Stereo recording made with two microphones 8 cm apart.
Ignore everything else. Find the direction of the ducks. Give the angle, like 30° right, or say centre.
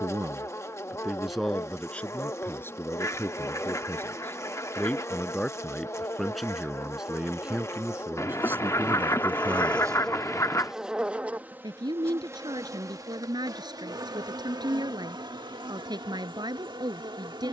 40° left.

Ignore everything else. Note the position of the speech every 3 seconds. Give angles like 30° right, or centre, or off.
centre, 20° left, 10° right, 40° right, 60° right, 60° right.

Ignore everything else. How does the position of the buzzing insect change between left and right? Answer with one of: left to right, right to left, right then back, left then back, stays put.
left to right.